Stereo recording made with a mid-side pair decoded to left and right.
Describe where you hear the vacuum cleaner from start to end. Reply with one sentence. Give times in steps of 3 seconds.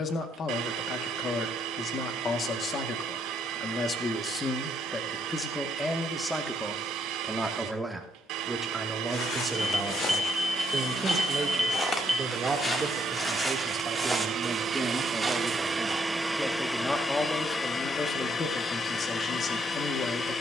You can hear the vacuum cleaner on the right from 0 s, in the centre from 15 s and on the left from 18 s.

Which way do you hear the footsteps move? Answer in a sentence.
In this clip you hear the footsteps go from the left side to the right.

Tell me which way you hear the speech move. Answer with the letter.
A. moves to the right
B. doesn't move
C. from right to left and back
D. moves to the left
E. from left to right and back
E.